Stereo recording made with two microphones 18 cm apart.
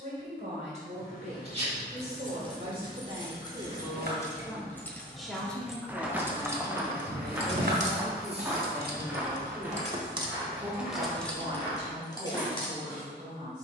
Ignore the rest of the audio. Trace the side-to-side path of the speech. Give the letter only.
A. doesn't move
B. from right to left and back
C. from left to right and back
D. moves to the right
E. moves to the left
B.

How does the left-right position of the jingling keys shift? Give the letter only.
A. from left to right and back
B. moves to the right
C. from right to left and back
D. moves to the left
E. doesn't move
A.